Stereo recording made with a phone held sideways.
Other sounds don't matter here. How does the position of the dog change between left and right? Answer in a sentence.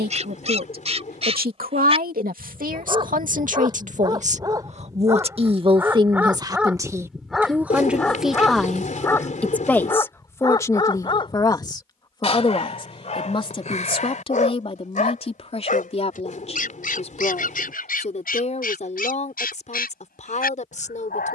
In this clip you hear the dog move to the left.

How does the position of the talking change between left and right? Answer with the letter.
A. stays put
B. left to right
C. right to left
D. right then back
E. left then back
C.